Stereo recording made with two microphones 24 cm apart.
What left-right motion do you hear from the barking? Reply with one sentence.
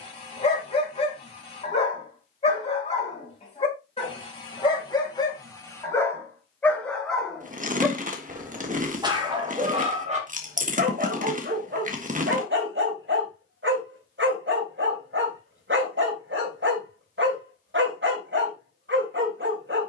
In this clip you hear the barking travel towards the right.